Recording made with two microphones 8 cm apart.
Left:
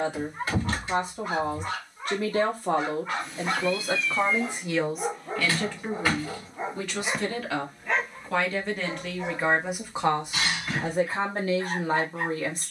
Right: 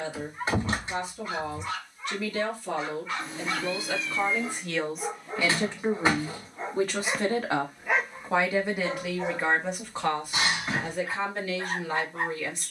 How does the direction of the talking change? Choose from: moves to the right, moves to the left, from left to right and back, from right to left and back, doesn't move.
from left to right and back.